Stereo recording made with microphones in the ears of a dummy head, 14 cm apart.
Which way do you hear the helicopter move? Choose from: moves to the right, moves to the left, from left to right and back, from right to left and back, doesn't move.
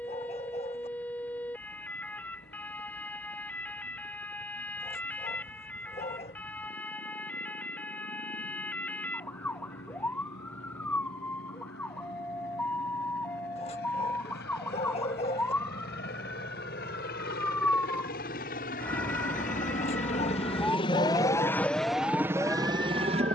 moves to the right.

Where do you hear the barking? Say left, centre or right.
left.